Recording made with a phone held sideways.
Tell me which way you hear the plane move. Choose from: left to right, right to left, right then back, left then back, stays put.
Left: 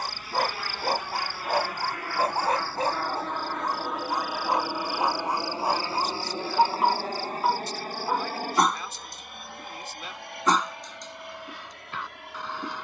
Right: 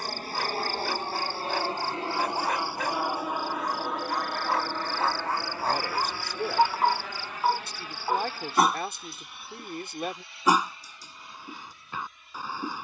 right to left.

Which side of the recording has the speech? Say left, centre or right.
right.